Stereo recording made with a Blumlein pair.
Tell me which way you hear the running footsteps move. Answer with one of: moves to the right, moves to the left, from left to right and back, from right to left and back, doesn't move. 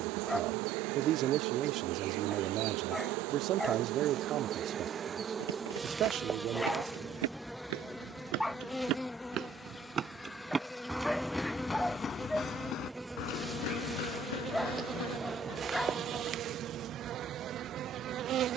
moves to the left.